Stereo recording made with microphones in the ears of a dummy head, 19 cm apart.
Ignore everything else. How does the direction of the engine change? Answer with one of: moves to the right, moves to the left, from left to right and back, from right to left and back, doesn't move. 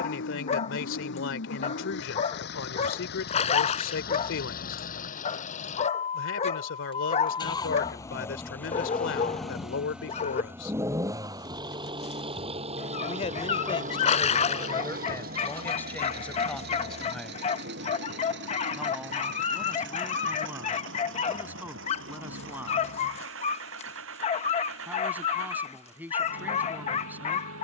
moves to the right.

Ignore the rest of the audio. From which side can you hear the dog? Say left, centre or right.
left.